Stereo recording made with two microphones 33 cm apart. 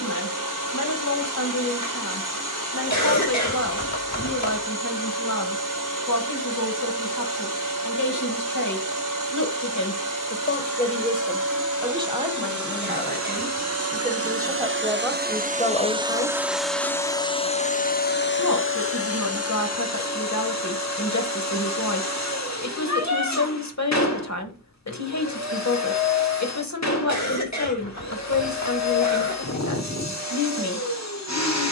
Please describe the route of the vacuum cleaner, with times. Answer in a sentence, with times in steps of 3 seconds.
In this clip you hear the vacuum cleaner on the right from 0 s, in the centre from 15 s and on the left from 18 s.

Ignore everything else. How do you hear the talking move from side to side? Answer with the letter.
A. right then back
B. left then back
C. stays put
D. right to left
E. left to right
A.